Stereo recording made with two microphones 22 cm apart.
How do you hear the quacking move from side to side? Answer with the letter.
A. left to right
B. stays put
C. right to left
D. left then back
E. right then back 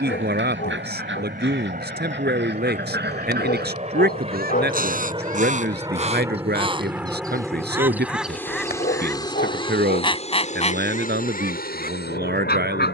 C.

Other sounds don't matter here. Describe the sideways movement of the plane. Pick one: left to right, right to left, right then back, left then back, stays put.
right to left.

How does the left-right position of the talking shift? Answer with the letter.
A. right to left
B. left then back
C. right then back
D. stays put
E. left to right
D.